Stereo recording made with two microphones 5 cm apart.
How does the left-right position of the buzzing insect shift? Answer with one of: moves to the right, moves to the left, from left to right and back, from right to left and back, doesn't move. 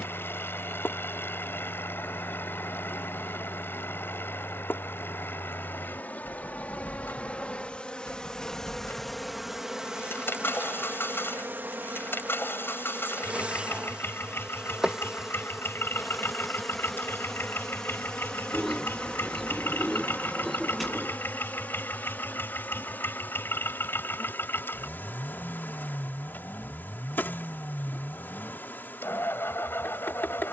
from left to right and back.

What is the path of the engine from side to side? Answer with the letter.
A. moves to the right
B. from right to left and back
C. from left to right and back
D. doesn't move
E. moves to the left
D.